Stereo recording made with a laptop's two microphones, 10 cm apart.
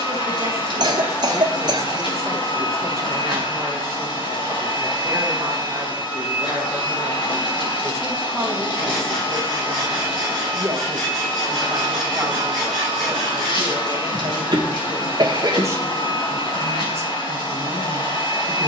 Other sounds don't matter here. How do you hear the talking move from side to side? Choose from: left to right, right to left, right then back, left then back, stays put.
stays put.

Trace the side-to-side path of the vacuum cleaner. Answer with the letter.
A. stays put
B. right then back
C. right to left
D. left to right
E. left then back
A.